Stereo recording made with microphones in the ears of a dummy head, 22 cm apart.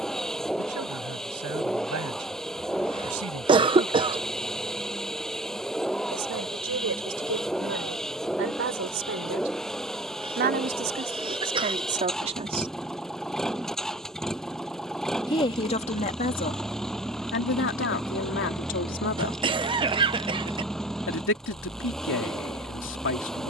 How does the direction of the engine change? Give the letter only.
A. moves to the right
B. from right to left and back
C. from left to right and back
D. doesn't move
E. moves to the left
D.